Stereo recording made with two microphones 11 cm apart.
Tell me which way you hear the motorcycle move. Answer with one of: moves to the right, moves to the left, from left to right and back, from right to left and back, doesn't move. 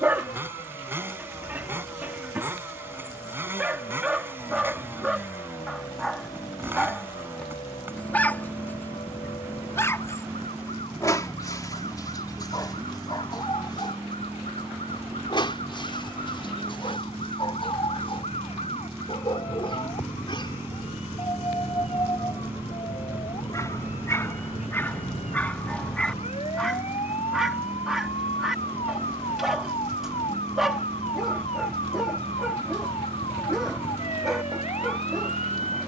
doesn't move.